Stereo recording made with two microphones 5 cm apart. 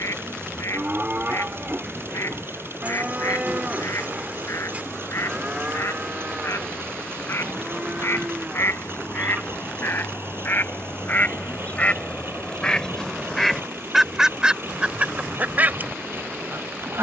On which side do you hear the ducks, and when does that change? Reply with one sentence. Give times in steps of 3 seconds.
You can hear the ducks on the left from 0 s, in the centre from 12 s and on the right from 15 s.